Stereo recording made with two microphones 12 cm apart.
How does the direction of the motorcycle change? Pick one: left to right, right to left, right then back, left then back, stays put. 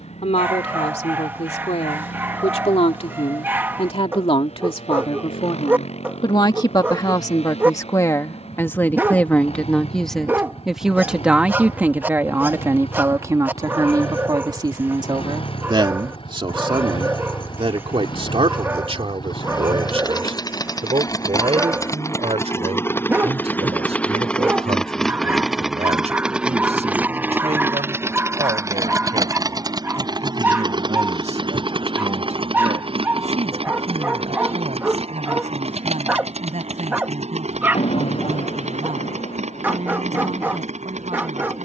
left to right.